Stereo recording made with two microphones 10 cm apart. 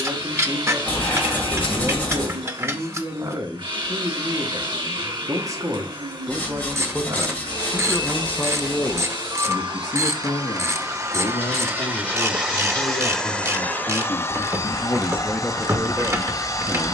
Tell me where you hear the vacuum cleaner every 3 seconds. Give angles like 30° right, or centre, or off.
50° right, 50° right, 50° right, 40° right, 10° left, 40° left.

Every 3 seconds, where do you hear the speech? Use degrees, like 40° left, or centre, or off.
30° right, 30° right, centre, 60° left, 70° left, 10° right.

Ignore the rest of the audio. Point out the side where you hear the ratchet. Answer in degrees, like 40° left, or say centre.
30° right.